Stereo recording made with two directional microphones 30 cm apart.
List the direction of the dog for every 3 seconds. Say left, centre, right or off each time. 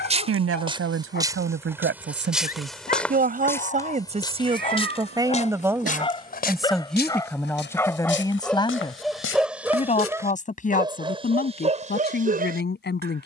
left, left, centre, centre, right.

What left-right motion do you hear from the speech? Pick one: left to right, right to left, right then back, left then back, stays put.
right to left.